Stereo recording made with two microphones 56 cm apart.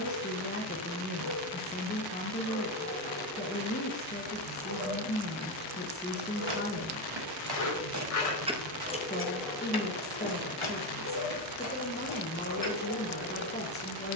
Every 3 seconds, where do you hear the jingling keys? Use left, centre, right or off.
off, off, right, left, left.